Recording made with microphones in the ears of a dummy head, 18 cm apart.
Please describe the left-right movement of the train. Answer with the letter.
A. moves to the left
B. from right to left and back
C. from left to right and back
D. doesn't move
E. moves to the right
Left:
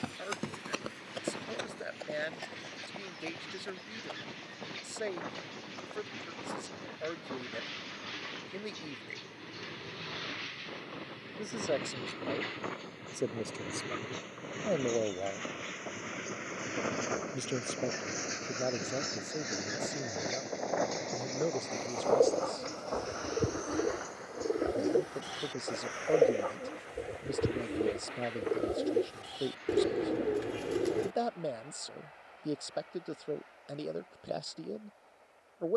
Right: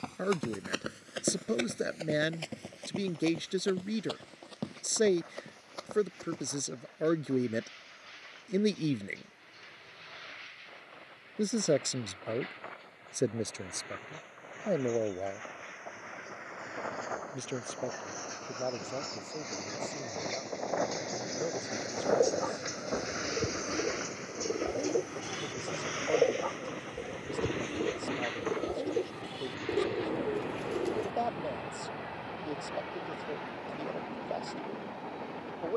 E.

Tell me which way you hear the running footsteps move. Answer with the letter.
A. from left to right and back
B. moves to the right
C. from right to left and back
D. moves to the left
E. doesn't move
B.